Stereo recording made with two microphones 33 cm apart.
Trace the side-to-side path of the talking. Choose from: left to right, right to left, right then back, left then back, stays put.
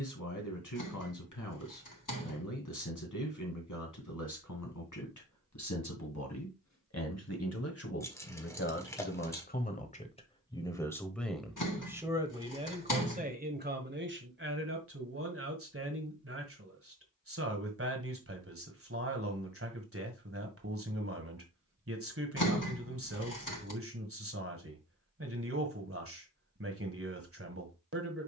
left to right.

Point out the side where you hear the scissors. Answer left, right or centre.
left.